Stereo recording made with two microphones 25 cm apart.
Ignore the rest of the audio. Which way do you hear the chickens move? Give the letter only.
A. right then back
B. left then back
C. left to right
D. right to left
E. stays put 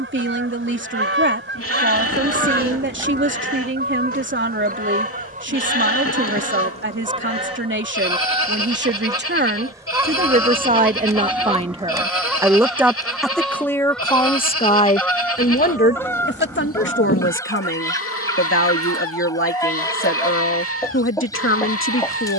D.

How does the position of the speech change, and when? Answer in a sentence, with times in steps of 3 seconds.
You can hear the speech on the right from 0 s, in the centre from 12 s and on the left from 15 s.